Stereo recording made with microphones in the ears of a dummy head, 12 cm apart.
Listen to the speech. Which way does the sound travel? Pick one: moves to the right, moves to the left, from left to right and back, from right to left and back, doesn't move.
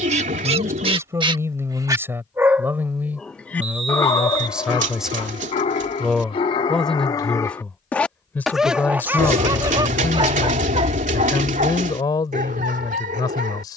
moves to the left.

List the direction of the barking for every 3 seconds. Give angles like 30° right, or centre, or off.
30° right, 30° left, 20° left, 40° right, 60° right.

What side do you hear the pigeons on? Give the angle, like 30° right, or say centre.
60° right.